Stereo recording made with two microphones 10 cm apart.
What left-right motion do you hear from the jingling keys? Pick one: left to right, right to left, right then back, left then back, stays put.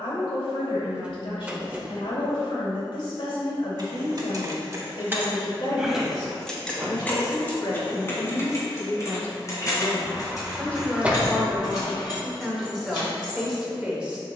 right to left.